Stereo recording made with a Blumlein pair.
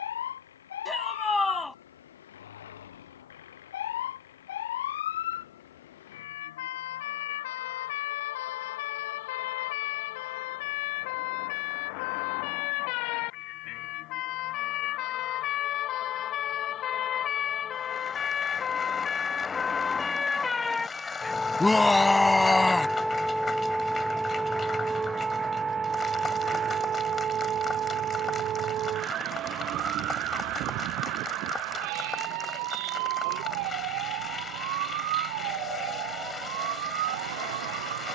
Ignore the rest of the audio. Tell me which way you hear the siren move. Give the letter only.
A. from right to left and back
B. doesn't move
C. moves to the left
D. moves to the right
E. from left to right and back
D.